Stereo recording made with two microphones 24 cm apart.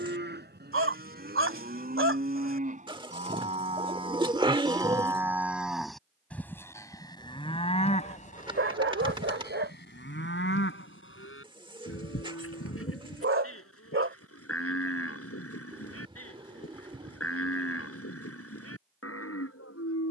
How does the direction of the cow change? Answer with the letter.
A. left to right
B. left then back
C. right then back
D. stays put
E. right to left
E.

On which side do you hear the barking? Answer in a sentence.
You can hear the barking on the right.